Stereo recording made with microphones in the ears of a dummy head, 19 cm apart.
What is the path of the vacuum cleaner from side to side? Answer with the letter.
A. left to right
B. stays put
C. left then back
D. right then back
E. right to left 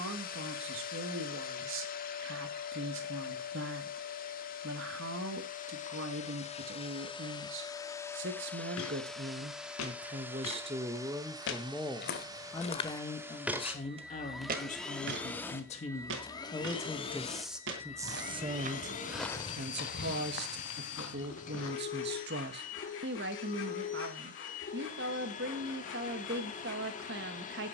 D.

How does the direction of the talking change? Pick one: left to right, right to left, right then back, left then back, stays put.
left then back.